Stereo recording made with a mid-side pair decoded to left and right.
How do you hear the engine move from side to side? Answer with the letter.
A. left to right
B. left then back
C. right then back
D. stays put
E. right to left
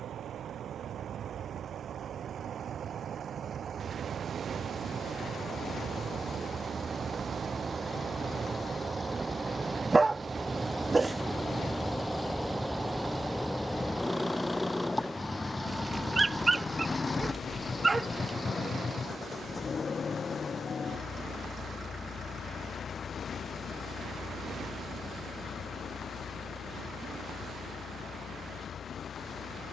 E.